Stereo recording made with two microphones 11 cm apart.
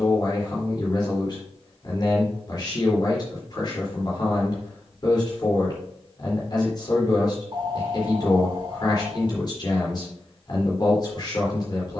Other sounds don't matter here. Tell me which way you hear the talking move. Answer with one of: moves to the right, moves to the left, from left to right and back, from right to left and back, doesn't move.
doesn't move.